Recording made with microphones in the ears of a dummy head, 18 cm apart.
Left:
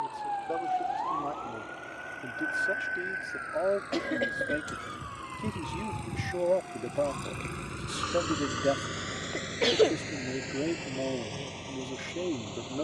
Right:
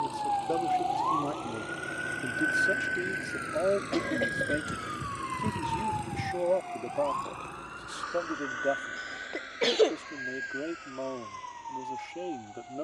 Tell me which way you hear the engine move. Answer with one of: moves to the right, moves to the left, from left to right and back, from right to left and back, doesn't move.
moves to the left.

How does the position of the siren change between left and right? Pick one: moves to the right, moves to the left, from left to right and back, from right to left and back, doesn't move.
moves to the right.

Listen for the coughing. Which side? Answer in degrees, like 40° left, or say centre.
centre.